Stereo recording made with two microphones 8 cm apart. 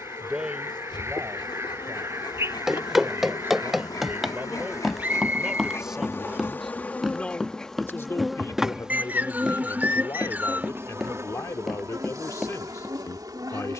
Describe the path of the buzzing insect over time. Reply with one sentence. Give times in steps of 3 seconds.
In this clip you hear the buzzing insect on the left from 0 s, in the centre from 6 s and on the right from 9 s.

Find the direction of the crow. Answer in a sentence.
In this clip you hear the crow on the right.